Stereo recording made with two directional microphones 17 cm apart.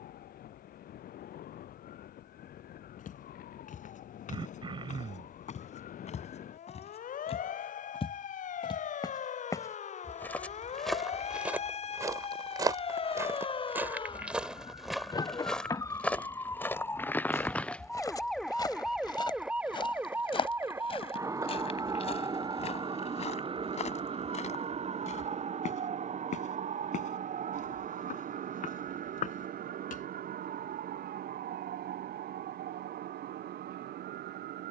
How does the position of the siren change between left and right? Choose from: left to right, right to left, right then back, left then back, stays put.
left to right.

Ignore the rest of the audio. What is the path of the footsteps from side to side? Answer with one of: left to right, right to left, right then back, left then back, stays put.
right then back.